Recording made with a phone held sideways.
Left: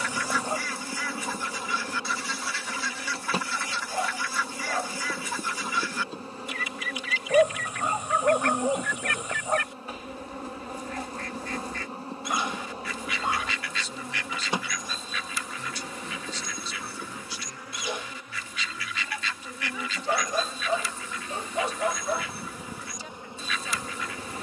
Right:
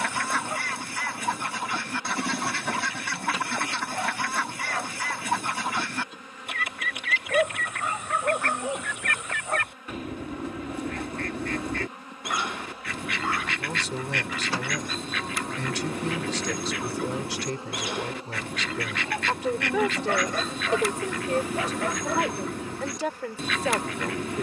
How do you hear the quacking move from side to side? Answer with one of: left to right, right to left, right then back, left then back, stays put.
stays put.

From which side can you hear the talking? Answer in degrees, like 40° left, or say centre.
80° right.